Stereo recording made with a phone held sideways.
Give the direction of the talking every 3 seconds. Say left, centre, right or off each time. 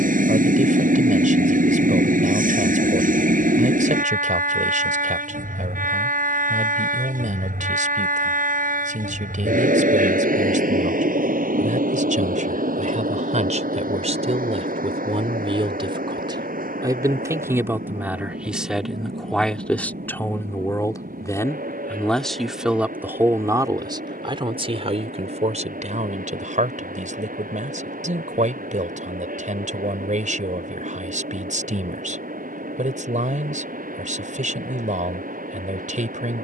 right, right, right, right, right, right, centre, centre, right, right, right, right.